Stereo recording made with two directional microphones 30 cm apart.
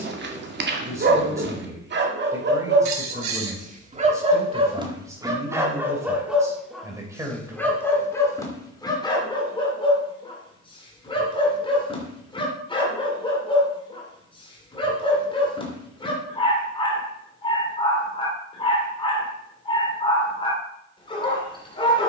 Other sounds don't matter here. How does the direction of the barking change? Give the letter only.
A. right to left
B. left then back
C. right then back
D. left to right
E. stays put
A.